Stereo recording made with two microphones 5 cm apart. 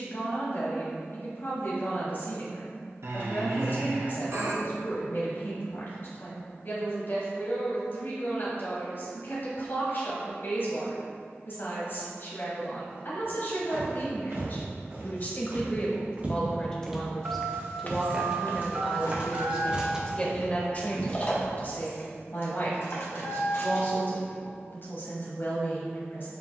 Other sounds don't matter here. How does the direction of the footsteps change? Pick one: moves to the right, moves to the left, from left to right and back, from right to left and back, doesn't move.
moves to the left.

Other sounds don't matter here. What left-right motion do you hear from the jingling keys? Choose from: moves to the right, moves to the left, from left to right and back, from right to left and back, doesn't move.
moves to the left.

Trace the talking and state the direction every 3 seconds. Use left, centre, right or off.
left, left, left, left, left, left, centre, left, left.